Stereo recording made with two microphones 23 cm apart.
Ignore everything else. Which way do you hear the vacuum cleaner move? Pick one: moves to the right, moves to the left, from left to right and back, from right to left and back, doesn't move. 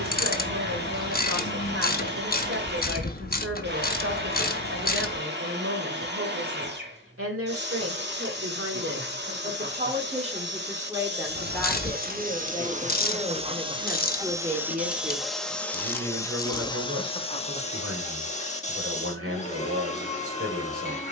moves to the left.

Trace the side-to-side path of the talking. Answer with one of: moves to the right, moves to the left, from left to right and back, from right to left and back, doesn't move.
from right to left and back.